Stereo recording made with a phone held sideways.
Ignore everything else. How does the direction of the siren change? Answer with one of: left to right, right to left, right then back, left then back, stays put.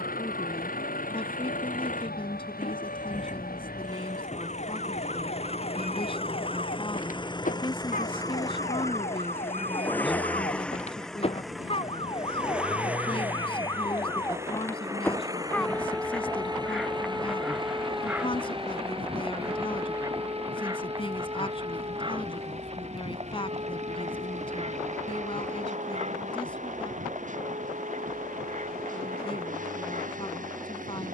left to right.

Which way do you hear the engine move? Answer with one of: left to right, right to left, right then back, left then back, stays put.
left to right.